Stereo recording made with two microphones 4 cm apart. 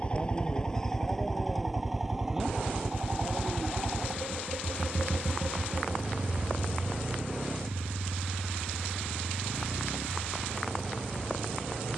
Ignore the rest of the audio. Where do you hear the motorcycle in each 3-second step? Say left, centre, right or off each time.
centre, right, right, right.